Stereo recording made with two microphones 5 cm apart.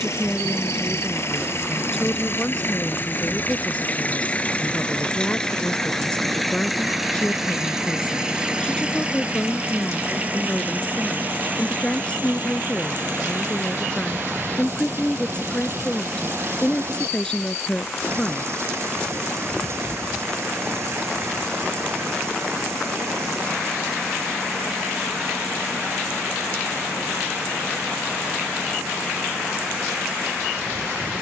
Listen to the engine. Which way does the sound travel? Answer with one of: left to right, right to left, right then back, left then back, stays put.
left to right.